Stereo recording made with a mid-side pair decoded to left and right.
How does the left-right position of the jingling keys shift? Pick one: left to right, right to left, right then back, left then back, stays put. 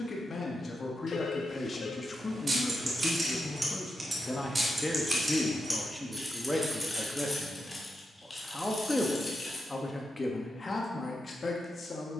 right to left.